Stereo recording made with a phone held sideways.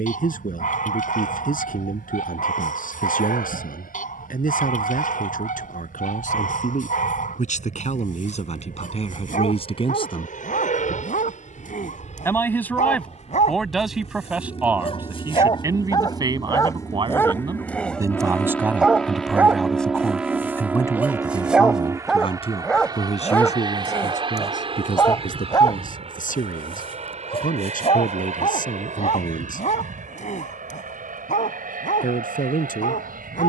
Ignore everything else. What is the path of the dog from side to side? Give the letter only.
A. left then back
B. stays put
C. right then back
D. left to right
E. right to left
C.